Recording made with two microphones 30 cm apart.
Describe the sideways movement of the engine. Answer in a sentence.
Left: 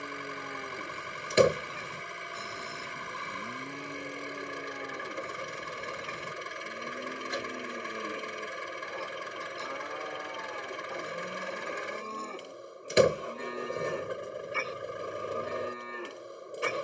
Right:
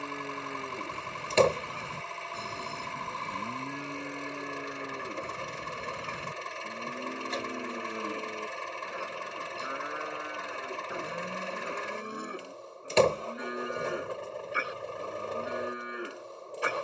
In this clip you hear the engine stay put.